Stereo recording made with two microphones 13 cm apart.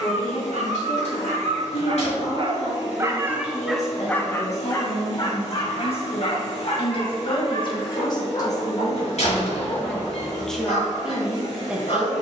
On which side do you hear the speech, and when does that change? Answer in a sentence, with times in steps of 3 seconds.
In this clip you hear the speech on the left from 0 s and in the centre from 9 s.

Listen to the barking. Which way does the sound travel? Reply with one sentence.
In this clip you hear the barking go from the right side to the left.